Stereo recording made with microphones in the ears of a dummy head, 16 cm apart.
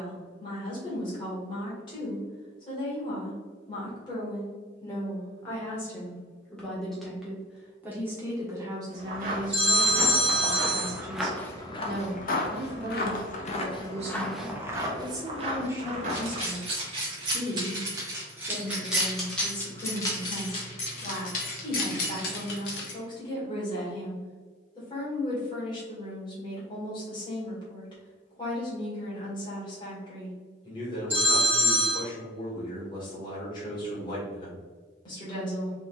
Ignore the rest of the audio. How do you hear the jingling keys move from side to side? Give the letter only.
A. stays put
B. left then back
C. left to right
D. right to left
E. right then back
D.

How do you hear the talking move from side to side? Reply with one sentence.
In this clip you hear the talking move from left to right and back again.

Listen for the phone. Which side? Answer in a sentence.
In this clip you hear the phone in the centre.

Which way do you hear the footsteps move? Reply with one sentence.
You can hear the footsteps move from right to left and back again.